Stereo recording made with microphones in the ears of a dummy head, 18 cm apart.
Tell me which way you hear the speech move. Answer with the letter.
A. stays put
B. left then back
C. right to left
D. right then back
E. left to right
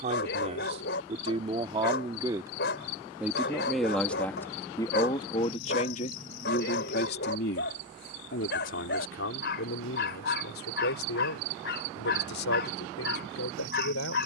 C.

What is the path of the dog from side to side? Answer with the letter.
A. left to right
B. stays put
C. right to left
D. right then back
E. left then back
B.